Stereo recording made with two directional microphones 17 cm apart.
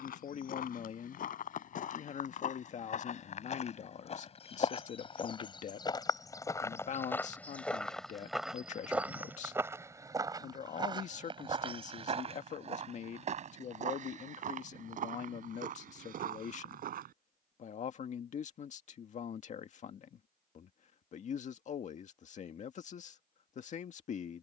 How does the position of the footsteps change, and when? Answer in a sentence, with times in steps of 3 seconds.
You can hear the footsteps on the left from 0 s, in the centre from 6 s, on the right from 9 s and not at all from 18 s.